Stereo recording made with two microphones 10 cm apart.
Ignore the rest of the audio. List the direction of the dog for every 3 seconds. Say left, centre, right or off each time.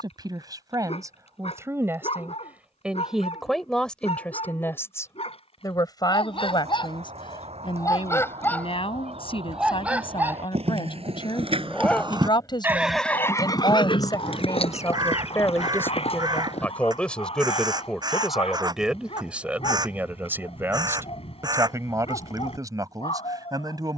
left, left, left, centre, left, left, left, left.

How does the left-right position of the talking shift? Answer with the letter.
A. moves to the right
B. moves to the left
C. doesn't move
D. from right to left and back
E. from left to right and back
D.